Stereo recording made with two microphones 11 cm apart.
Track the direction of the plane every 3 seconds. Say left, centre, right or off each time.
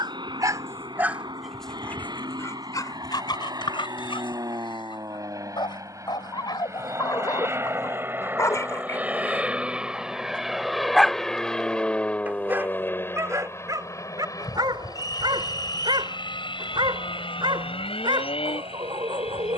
right, right, right, centre, left, left, left.